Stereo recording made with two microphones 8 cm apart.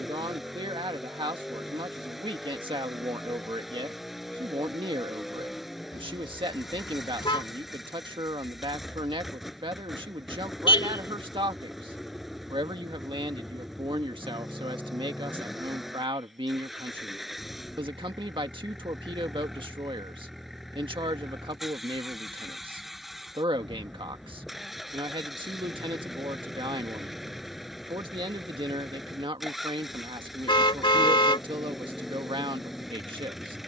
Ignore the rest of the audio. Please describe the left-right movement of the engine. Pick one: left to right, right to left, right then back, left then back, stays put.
stays put.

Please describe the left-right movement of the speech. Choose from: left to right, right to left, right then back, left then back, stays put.
stays put.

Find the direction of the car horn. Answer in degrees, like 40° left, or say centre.
80° left.